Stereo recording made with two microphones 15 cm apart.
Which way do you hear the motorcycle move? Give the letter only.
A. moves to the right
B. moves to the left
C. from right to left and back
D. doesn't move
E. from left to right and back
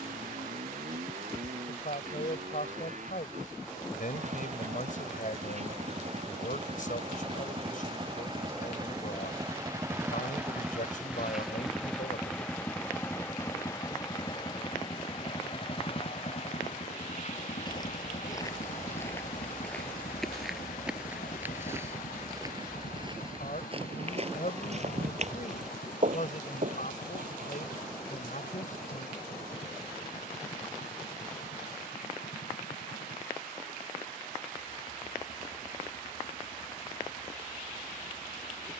B.